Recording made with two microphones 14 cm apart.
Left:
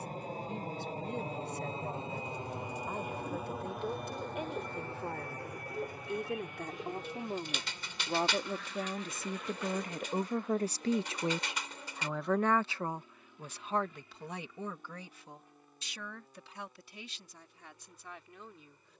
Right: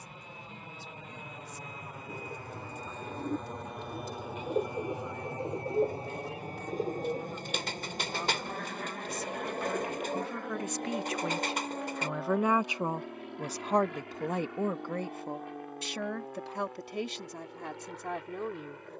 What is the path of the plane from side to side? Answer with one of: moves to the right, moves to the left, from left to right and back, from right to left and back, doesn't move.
moves to the right.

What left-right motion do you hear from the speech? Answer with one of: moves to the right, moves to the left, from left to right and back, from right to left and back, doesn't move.
moves to the right.